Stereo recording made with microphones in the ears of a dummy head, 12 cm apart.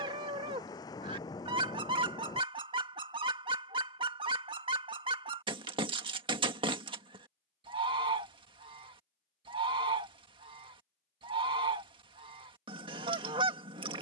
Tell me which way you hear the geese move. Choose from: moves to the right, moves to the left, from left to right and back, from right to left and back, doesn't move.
doesn't move.